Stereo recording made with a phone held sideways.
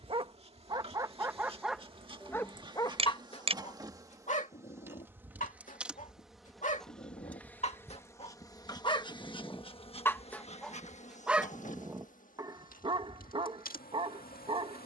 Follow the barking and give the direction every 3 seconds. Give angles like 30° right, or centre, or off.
10° right, 50° left, 40° left, 10° left, 30° right.